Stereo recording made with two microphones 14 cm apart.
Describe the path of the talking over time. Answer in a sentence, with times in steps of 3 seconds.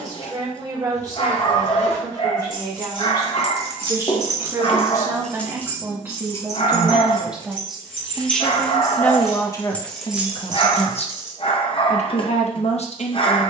In this clip you hear the talking on the right from 0 s, in the centre from 6 s and on the left from 9 s.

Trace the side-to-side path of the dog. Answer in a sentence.
You can hear the dog stay in one place.